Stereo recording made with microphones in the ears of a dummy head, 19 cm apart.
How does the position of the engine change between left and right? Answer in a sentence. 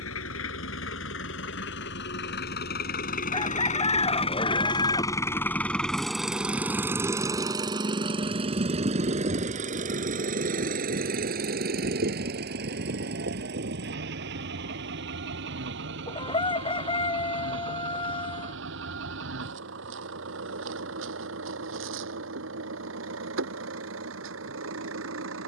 You can hear the engine travel towards the right.